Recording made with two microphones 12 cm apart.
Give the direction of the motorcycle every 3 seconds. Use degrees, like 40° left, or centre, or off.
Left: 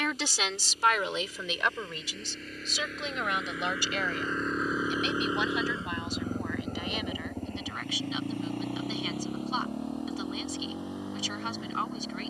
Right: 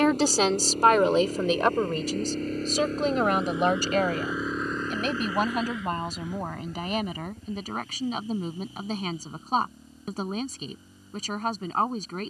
50° right, centre, 60° left, 70° left.